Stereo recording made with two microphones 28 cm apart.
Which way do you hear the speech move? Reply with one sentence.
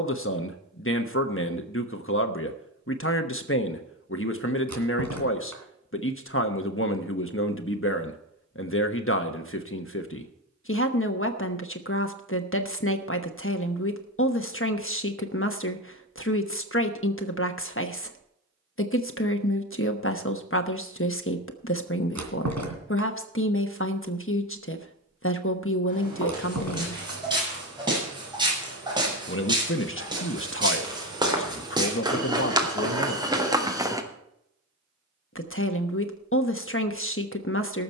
You can hear the speech stay put.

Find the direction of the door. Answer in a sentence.
In this clip you hear the door on the right.